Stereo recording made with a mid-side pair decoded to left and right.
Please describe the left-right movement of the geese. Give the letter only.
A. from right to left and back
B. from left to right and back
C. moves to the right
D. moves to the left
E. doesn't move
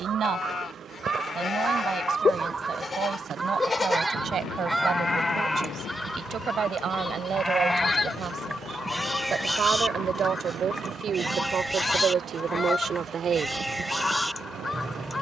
D.